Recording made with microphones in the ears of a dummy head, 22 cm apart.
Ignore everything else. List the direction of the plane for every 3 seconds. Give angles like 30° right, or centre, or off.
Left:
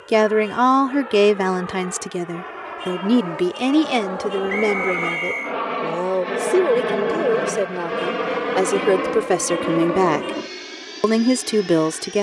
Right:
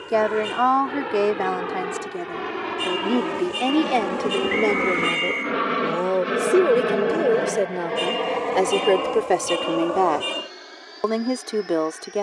70° right, 40° right, centre, 40° left.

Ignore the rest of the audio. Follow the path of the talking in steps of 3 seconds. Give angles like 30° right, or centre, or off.
40° left, 20° left, centre, 30° left.